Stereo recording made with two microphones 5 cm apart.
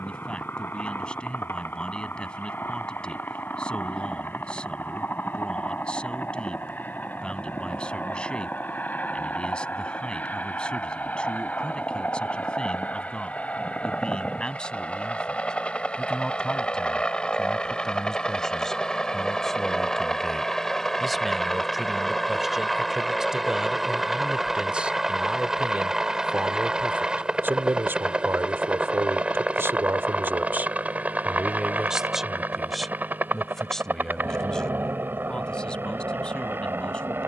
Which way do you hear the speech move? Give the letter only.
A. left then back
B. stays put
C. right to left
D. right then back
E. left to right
D.